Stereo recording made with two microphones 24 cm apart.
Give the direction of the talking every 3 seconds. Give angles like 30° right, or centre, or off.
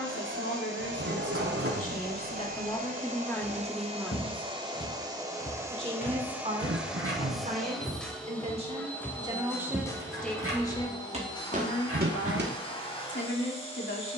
40° left, centre, 30° right, 10° left, 50° left.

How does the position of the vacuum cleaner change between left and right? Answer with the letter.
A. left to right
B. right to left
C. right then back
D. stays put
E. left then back
B.